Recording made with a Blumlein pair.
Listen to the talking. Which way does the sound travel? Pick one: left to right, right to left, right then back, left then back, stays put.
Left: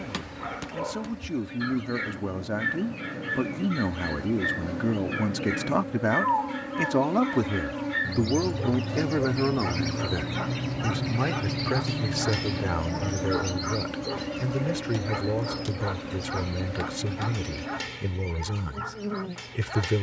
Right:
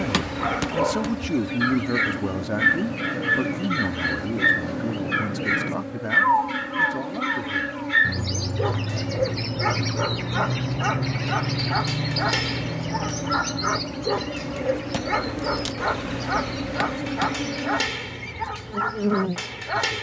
right to left.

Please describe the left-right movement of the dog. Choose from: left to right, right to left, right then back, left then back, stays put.
stays put.